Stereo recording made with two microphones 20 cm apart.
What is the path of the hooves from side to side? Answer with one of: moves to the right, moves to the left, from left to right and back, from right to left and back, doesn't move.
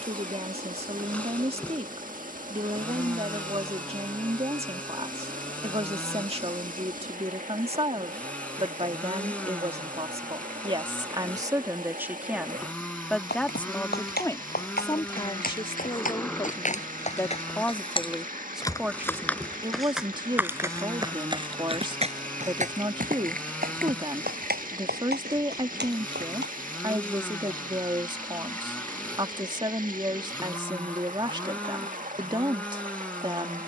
moves to the right.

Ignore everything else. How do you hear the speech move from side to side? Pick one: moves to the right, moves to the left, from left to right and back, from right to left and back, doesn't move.
from right to left and back.